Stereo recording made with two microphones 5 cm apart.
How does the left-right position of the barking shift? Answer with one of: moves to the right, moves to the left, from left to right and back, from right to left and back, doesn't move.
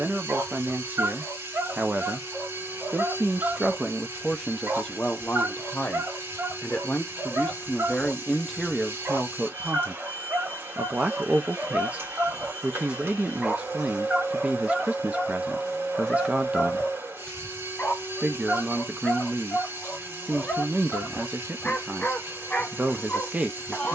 moves to the left.